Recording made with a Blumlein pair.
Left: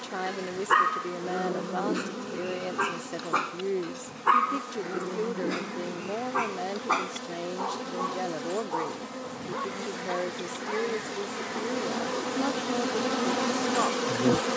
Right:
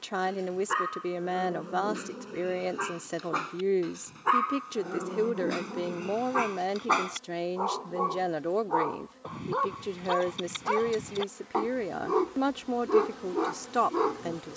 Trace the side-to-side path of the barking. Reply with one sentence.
In this clip you hear the barking move from left to right.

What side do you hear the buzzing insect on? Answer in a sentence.
You can hear the buzzing insect on the left.